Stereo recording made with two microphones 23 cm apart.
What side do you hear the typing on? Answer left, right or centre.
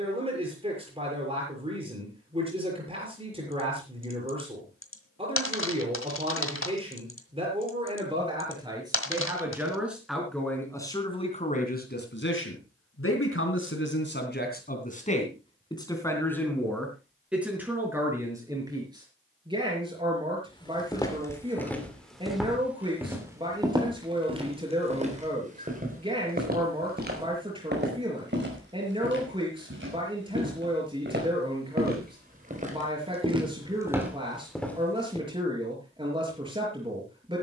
left.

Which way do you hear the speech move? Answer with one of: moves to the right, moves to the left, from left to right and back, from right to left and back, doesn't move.
from right to left and back.